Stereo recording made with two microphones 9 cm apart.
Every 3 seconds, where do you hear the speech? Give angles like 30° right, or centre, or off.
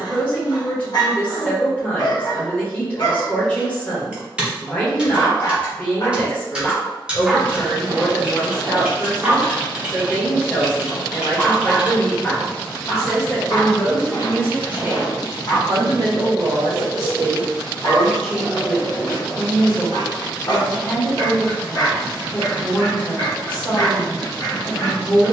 10° left, 10° left, 10° left, 10° left, 10° right, 40° right, 10° left, 10° left, 10° left.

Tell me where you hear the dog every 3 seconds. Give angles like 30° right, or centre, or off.
50° left, 50° left, 10° right, centre, 40° left, 50° left, 50° left, 50° left, 50° left.